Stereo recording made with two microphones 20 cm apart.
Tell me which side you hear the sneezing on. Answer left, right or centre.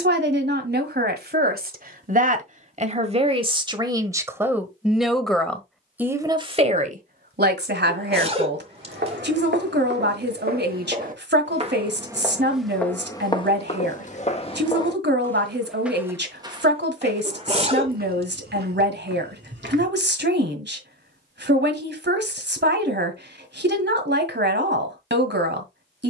right.